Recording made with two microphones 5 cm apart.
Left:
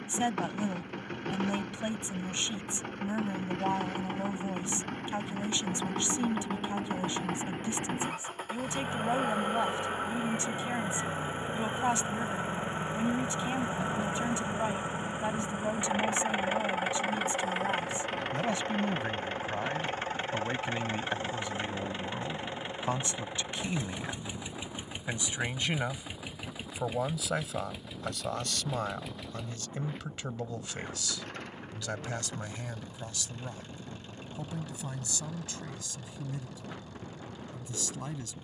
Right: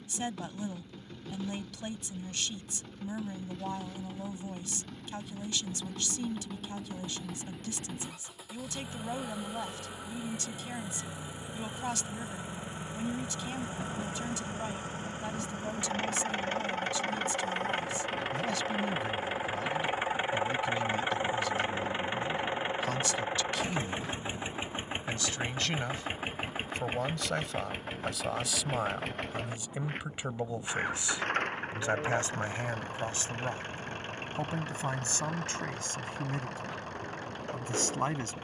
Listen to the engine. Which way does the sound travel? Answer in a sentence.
In this clip you hear the engine go from the left side to the right.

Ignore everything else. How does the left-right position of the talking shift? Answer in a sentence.
In this clip you hear the talking move from left to right.